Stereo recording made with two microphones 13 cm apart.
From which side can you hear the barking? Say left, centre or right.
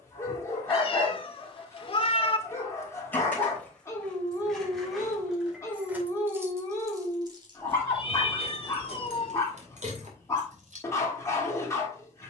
left.